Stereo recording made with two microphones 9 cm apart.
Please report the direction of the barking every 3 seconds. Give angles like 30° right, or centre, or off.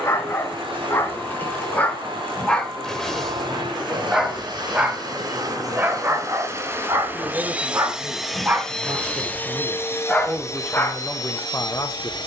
20° left, 10° right, 20° right, 10° left.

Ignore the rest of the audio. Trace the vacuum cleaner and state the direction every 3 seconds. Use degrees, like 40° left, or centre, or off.
60° right, 50° right, 10° right, 40° left.